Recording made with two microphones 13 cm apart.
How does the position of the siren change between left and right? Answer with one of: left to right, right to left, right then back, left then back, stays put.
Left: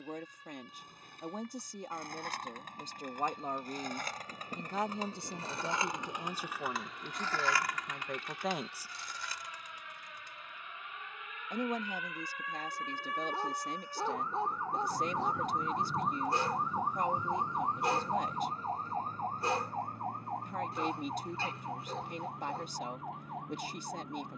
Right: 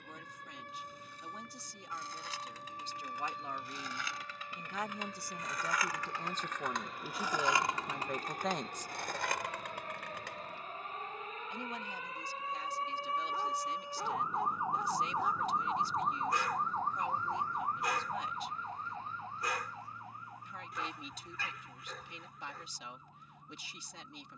right to left.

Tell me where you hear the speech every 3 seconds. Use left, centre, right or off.
left, left, centre, left, left, left, left, left.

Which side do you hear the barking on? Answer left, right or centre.
left.